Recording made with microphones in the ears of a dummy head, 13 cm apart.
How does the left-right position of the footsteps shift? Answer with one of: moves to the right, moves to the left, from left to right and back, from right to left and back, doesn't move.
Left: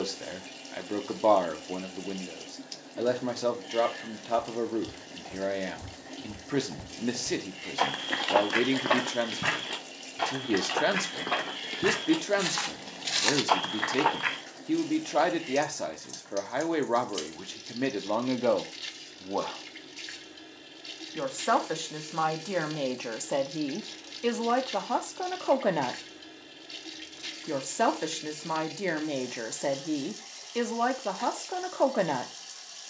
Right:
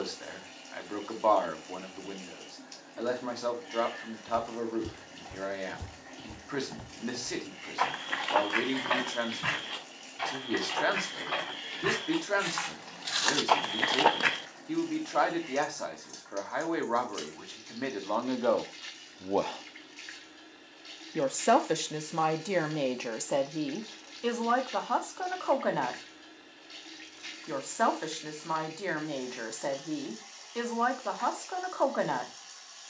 from right to left and back.